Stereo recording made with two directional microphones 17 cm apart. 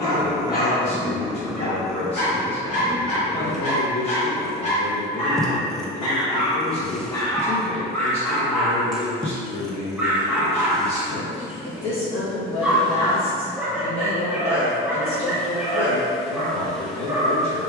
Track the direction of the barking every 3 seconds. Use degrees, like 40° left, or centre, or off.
60° left, 40° left, 10° left, 10° right, 10° right, 10° right.